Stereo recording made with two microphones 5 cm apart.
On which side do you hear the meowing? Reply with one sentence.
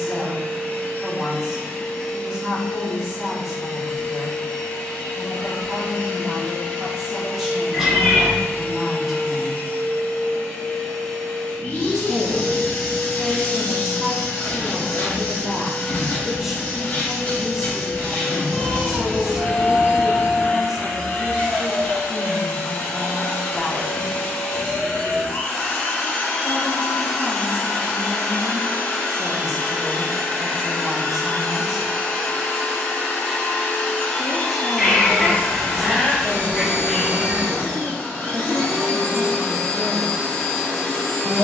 In this clip you hear the meowing in the centre.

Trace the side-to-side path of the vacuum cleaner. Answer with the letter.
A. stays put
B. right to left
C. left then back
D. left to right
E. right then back
A.